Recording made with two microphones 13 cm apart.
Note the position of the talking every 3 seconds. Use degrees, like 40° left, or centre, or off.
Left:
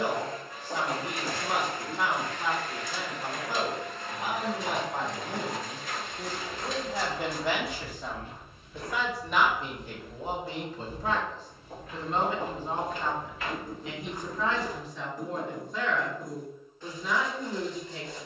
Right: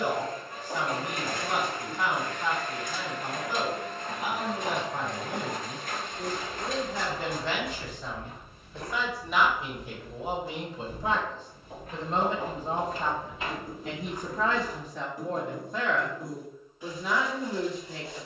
30° left, 30° left, 10° left, 10° right, 40° right, 60° right.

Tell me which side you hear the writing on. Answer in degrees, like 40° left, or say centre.
10° right.